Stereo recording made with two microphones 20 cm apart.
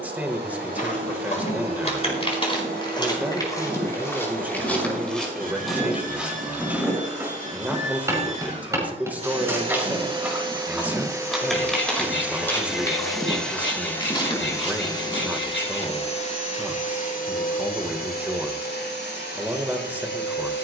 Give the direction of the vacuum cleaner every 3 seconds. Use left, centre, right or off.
right, right, right, right, centre, left, left.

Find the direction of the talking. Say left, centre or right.
centre.